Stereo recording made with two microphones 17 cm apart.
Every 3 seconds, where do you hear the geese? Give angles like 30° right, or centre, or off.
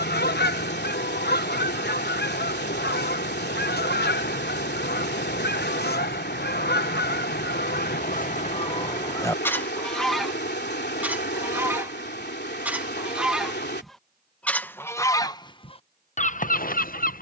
70° left, 70° left, 60° left, centre, centre, 40° left.